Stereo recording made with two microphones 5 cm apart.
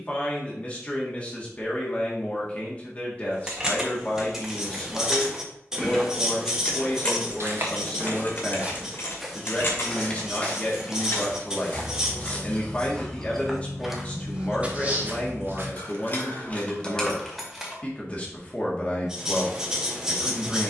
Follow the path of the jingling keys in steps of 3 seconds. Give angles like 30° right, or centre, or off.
off, 10° right, 30° left, 50° left, 70° left, 30° left, off.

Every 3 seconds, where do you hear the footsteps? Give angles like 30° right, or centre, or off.
off, off, 40° right, 20° left, centre, 40° right, off.